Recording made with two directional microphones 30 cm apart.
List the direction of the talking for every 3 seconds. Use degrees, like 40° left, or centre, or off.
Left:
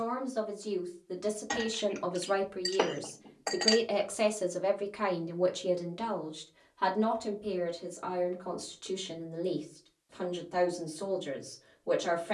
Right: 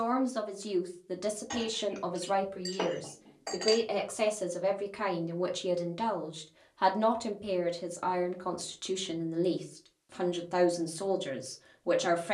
10° right, centre, 30° right, 40° right.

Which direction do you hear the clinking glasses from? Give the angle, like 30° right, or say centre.
30° left.